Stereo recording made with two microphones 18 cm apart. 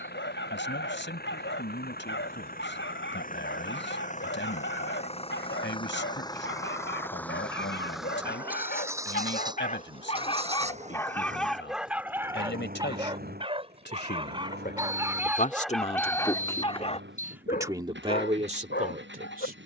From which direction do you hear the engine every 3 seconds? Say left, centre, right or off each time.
left, left, centre, right, right, right, right.